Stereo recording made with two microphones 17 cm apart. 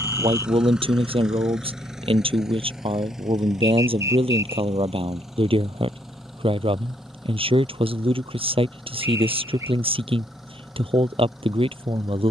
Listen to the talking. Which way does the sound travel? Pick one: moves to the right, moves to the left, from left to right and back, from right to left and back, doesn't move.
doesn't move.